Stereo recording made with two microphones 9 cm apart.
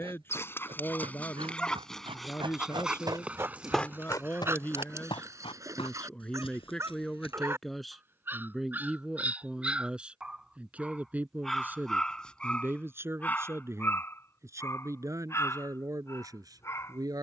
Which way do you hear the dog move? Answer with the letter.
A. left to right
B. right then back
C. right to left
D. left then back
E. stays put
B.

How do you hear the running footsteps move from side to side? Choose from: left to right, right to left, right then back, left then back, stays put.
right to left.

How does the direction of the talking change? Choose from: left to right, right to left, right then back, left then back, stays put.
left to right.